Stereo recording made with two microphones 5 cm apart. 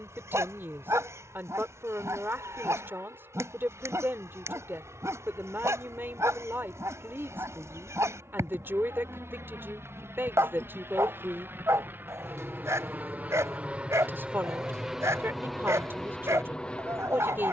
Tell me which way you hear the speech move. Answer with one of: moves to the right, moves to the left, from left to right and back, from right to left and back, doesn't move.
doesn't move.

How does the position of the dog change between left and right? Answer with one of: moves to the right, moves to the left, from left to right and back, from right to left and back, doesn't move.
doesn't move.